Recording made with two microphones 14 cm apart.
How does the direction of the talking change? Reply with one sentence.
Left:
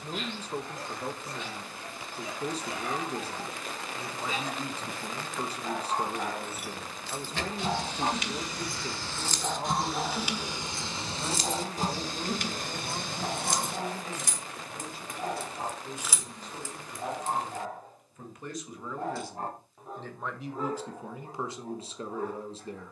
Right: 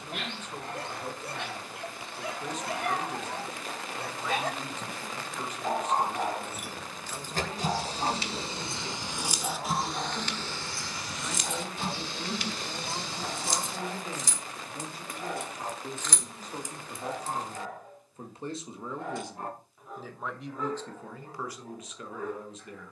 In this clip you hear the talking move from left to right and back again.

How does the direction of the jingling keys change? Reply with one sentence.
In this clip you hear the jingling keys go left and come back.